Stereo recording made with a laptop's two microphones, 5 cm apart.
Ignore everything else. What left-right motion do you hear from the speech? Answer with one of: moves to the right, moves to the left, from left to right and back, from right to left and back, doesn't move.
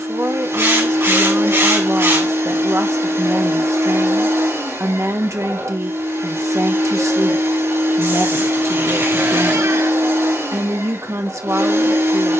doesn't move.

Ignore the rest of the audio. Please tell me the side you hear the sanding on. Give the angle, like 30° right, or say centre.
60° right.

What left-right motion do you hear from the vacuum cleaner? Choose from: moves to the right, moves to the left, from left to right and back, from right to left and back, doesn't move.
doesn't move.